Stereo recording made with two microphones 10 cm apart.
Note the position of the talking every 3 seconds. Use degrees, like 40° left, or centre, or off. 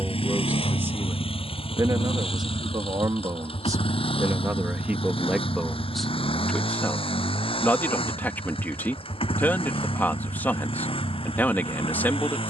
30° right, 20° right, 20° left, 20° left.